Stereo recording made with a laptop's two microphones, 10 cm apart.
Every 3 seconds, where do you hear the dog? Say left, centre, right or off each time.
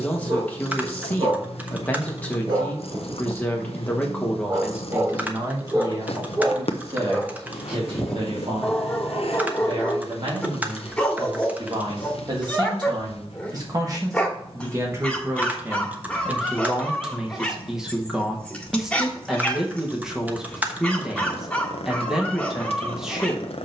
right, right, centre, centre, centre, centre, centre, centre.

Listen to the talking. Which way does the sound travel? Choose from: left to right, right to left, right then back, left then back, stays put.
right then back.